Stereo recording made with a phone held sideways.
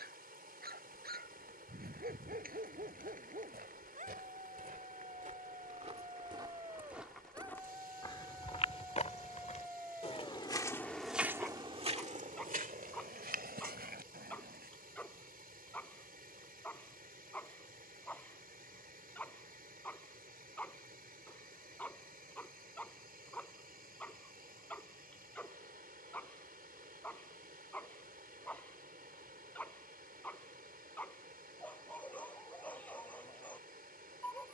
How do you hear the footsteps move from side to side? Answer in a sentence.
You can hear the footsteps go left and come back.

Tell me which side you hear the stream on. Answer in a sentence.
You can hear the stream on the right.